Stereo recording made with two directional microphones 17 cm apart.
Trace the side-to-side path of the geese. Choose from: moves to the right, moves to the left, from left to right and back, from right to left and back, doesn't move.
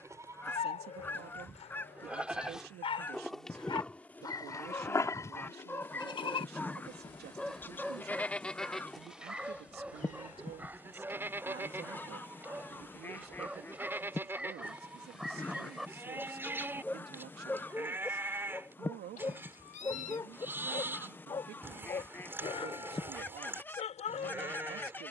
doesn't move.